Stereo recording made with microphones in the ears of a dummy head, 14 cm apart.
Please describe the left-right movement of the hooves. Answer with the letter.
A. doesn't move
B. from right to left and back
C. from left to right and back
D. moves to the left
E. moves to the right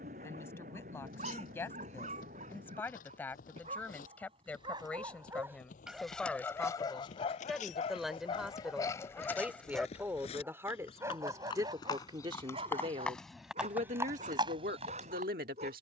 E.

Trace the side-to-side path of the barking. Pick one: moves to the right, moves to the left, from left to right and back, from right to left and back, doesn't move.
from right to left and back.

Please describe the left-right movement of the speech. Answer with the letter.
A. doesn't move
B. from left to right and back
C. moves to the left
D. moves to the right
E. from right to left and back
D.